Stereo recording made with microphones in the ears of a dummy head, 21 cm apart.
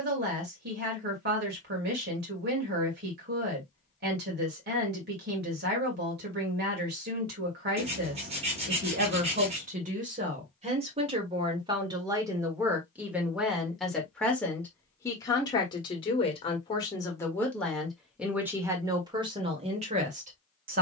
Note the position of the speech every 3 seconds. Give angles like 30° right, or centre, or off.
40° right, 40° right, 40° right, 30° right, centre, 20° left, 20° right.